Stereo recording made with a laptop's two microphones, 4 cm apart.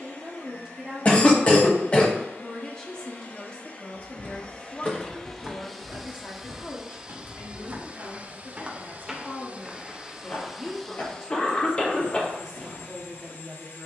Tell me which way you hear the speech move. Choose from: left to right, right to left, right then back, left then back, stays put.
left then back.